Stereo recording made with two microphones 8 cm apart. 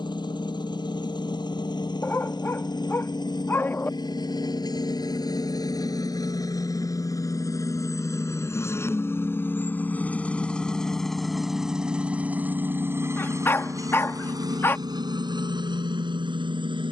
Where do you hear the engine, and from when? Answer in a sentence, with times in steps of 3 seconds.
You can hear the engine on the left from 0 s, in the centre from 9 s and on the right from 12 s.